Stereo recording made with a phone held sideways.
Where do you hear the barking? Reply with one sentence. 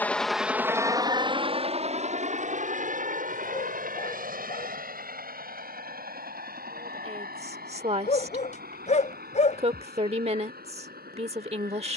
In this clip you hear the barking on the left.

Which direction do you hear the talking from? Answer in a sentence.
In this clip you hear the talking on the right.